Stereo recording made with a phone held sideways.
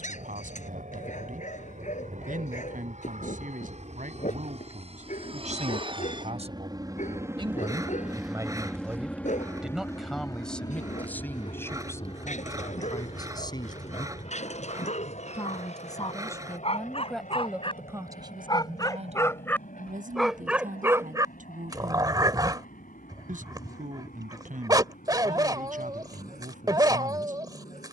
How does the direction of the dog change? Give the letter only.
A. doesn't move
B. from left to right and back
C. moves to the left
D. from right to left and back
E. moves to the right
E.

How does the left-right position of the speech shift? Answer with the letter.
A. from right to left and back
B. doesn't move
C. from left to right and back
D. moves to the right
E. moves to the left
A.